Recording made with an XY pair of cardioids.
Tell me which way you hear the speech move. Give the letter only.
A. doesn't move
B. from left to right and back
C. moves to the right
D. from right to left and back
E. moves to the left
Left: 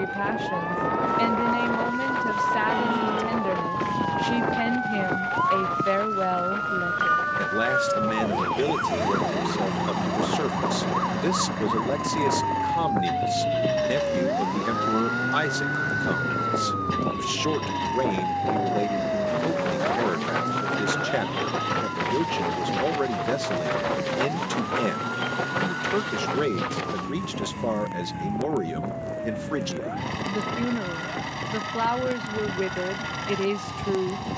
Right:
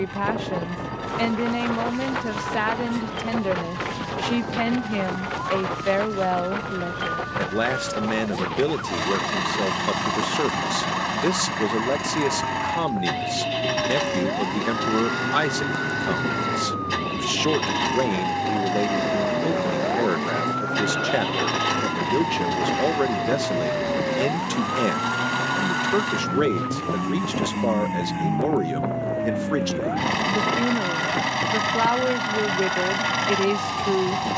A.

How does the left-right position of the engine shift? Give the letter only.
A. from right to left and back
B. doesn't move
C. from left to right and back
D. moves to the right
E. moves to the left
B.